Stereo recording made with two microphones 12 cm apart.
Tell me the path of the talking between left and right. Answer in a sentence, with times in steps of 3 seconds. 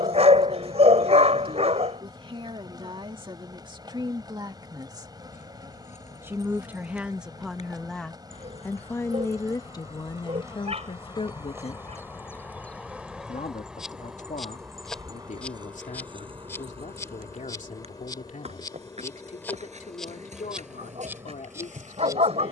You can hear the talking on the right from 0 s, in the centre from 6 s and on the left from 9 s.